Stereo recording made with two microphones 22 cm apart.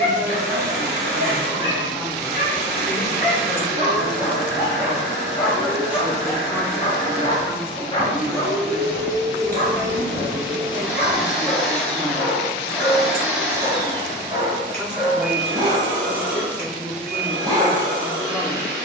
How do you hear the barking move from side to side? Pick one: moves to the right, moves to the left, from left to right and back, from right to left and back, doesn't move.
from right to left and back.